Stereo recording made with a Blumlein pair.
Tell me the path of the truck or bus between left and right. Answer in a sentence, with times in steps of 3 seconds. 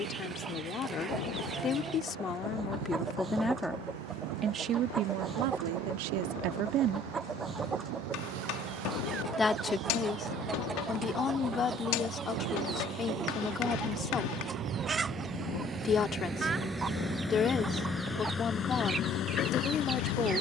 In this clip you hear the truck or bus on the right from 0 s, in the centre from 15 s and on the left from 18 s.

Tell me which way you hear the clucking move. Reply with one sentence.
You can hear the clucking stay put.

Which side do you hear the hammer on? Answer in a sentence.
In this clip you hear the hammer on the left.